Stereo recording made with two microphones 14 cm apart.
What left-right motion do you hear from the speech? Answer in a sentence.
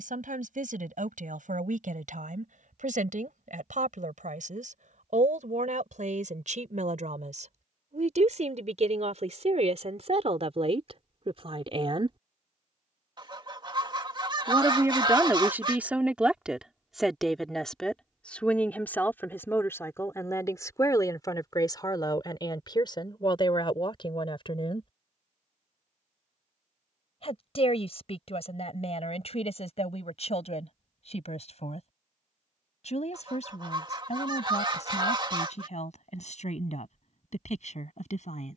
You can hear the speech move from right to left.